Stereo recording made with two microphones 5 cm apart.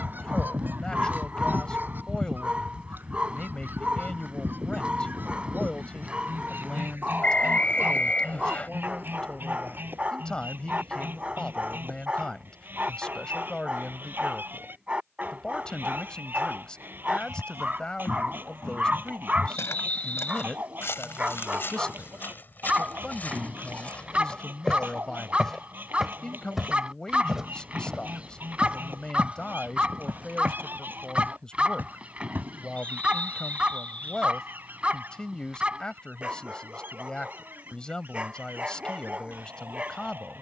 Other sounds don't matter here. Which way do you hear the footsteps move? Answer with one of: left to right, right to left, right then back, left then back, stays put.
left to right.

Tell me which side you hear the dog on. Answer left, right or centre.
right.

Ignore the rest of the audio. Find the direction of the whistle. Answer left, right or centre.
left.